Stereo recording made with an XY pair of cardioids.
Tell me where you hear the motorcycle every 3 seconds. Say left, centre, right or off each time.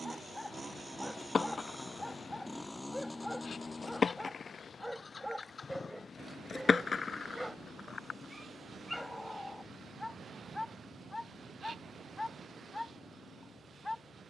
centre, left, left, left, left.